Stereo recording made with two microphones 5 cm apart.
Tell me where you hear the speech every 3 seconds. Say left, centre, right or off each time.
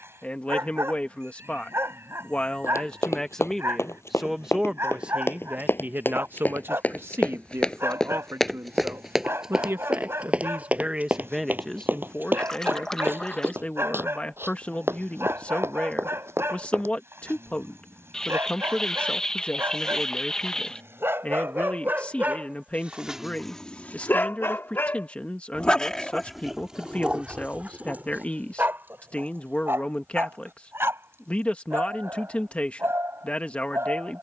left, centre, right, right, left, left, left, left, left, left, left, left.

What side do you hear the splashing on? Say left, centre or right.
centre.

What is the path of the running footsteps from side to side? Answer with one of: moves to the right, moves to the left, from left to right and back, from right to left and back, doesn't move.
moves to the right.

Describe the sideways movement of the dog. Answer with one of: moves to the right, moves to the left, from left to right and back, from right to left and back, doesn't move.
from right to left and back.